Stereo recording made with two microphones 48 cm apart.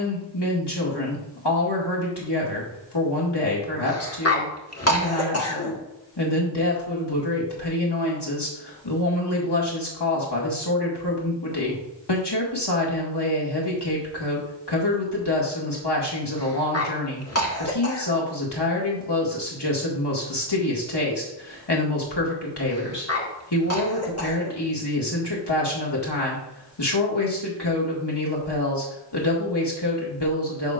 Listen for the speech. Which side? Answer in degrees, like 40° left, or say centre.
60° left.